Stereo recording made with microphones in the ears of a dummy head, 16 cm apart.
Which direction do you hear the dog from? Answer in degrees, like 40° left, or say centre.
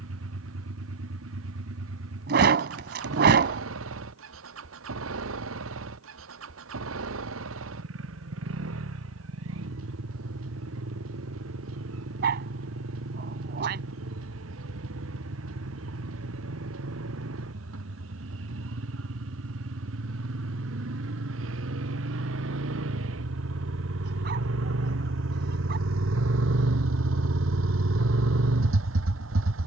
60° right.